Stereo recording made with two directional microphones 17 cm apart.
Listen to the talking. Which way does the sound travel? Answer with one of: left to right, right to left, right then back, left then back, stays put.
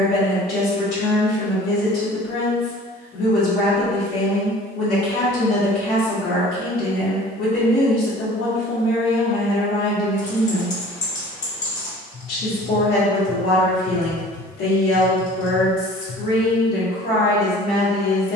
stays put.